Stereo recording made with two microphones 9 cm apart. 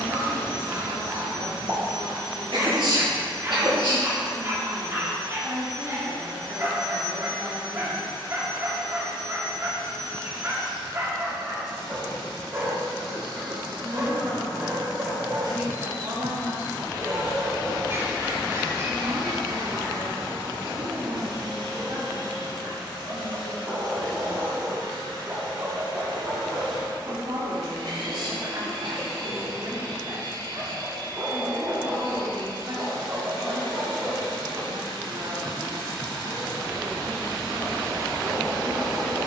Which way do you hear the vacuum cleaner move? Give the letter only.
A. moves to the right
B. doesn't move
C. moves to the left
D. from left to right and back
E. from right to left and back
B.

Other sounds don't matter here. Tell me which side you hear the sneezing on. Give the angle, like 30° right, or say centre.
70° right.